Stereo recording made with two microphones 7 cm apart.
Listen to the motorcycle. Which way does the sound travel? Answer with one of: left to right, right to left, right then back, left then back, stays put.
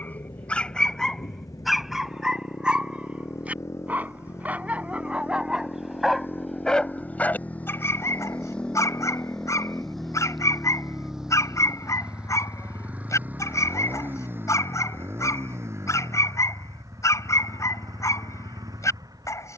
left to right.